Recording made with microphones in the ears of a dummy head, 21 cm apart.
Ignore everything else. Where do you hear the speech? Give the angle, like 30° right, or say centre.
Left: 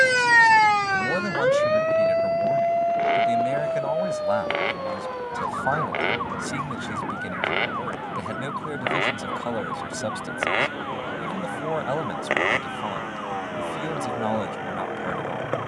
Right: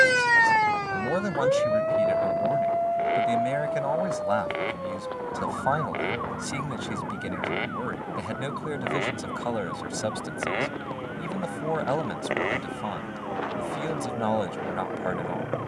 centre.